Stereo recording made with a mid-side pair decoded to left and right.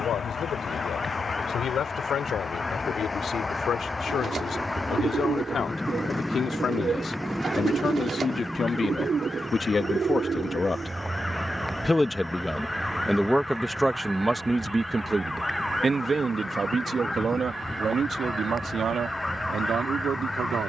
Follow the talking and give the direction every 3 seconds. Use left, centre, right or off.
left, left, left, left, centre, right, right.